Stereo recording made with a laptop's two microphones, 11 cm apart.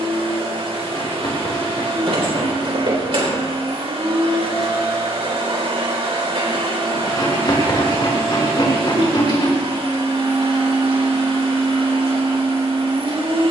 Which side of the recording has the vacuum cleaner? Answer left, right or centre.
right.